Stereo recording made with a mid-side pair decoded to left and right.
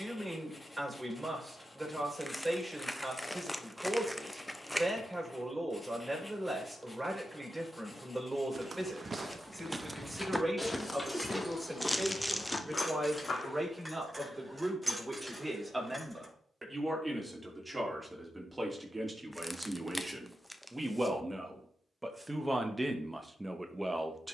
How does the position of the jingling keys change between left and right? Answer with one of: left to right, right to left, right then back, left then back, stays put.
left to right.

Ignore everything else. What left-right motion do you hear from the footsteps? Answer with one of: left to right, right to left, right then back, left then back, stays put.
right to left.